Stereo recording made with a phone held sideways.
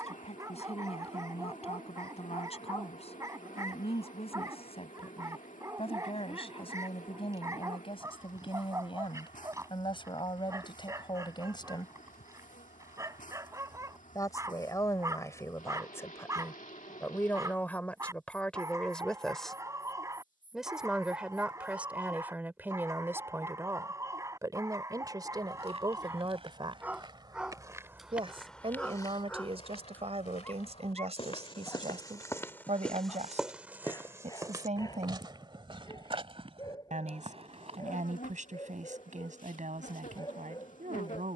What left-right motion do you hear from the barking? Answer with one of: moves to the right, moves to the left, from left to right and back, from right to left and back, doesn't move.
moves to the left.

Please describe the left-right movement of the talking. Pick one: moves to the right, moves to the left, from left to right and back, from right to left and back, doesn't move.
moves to the right.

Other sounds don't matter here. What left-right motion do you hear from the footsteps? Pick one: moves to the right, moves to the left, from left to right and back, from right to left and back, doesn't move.
from right to left and back.